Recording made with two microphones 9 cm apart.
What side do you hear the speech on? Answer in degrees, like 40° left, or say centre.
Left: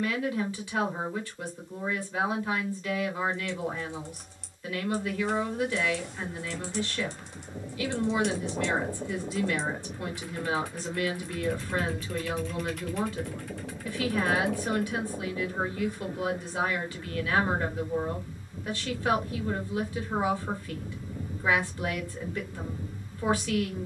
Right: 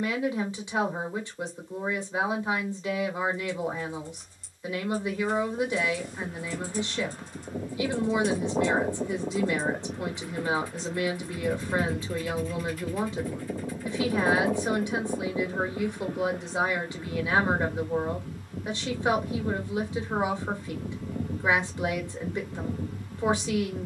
20° right.